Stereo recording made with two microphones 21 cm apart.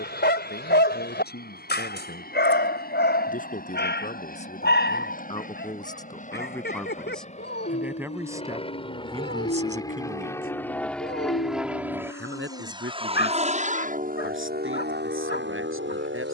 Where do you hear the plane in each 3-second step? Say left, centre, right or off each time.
left, left, left, centre, right, right.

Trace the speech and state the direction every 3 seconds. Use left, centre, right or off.
left, left, centre, right, right, right.